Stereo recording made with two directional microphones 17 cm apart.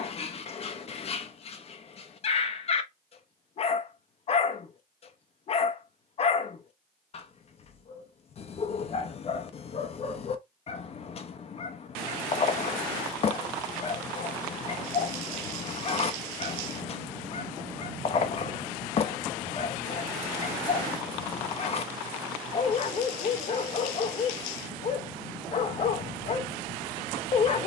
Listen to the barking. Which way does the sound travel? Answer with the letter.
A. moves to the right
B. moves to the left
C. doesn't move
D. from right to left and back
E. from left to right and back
C.